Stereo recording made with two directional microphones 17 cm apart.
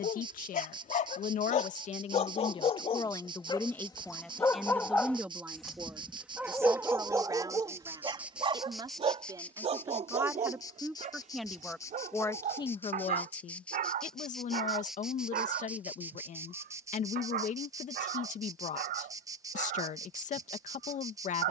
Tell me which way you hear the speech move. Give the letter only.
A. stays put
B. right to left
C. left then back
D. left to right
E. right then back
E.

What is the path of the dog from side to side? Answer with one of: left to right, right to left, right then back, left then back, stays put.
left to right.